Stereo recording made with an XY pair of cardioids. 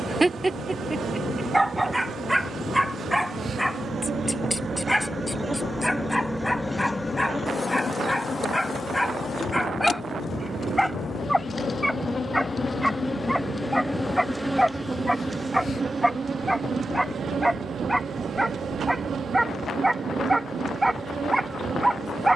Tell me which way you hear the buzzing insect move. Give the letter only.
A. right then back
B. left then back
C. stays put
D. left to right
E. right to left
B.